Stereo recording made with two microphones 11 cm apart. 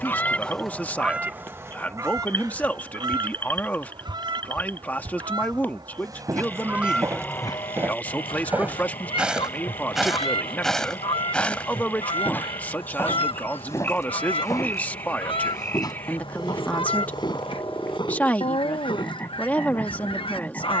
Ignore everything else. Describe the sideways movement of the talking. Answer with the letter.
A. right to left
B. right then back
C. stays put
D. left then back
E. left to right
C.